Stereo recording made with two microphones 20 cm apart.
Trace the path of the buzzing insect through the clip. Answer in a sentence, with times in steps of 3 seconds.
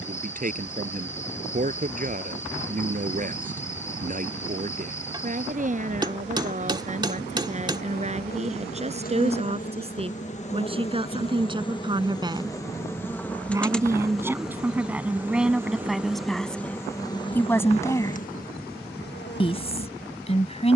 You can hear the buzzing insect on the left from 0 s, in the centre from 12 s and on the left from 18 s.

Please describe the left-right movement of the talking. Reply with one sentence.
In this clip you hear the talking move to the left.